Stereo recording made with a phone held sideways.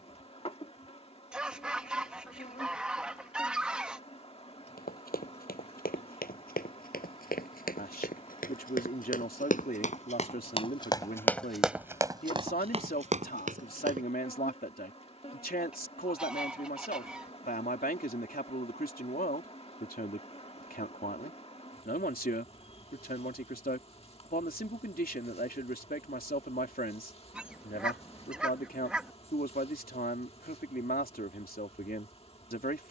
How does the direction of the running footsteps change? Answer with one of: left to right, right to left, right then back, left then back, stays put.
left to right.